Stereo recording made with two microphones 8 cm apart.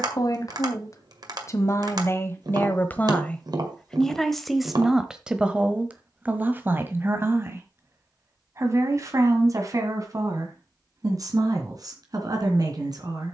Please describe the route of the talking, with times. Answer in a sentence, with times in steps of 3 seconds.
In this clip you hear the talking on the left from 0 s, in the centre from 3 s and on the right from 6 s.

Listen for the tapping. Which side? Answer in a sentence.
You can hear the tapping on the right.